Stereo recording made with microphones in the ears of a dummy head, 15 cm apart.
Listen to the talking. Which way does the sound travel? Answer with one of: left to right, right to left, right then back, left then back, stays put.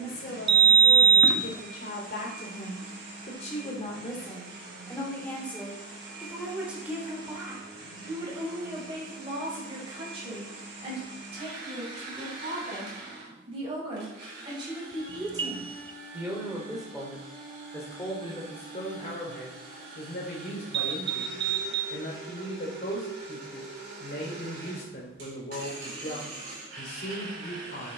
right then back.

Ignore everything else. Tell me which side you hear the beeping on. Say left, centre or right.
right.